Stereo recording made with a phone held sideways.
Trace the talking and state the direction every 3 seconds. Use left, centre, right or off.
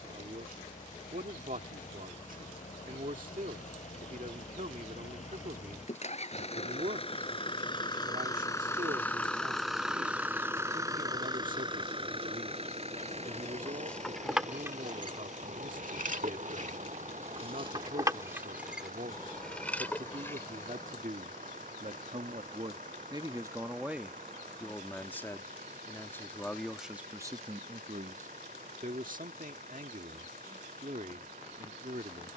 right, right, right, right, right, right, right, right, centre, right, right.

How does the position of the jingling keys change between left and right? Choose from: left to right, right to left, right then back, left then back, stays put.
right then back.